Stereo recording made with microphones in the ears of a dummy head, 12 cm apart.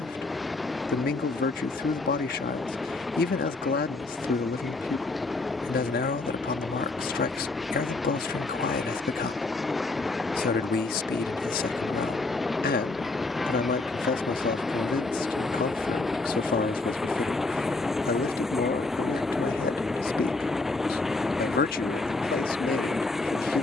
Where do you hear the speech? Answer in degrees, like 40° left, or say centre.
70° left.